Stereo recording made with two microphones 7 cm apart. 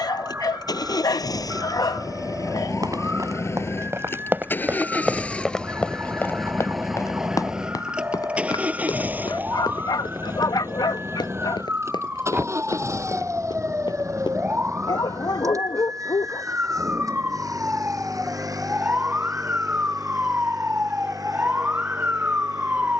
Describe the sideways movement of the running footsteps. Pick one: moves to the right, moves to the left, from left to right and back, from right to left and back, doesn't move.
moves to the left.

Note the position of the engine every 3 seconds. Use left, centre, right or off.
left, left, centre, right, right, right, right, right.